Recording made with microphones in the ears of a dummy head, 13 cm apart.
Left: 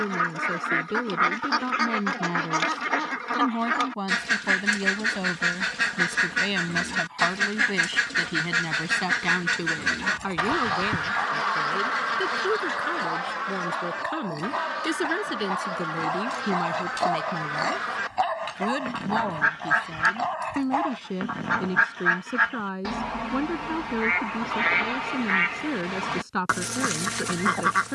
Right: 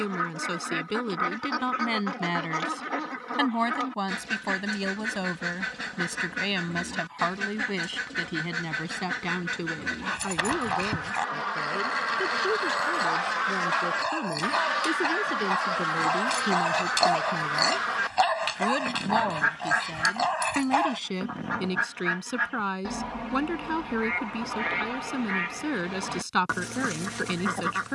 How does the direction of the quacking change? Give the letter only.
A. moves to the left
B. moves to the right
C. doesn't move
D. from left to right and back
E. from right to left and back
D.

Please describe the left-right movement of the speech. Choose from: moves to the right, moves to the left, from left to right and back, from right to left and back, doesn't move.
from right to left and back.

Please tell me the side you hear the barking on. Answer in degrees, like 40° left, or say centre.
60° right.